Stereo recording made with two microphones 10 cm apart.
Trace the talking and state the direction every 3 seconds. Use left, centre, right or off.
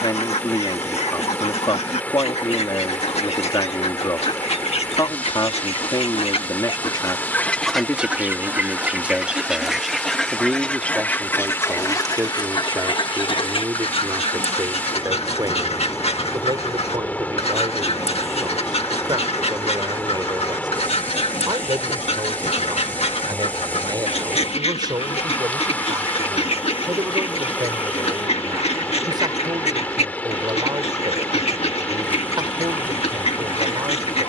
left, left, left, centre, right, right, right, right, right, right, right, right.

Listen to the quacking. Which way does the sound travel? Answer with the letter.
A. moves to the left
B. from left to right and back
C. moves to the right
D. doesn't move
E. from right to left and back
B.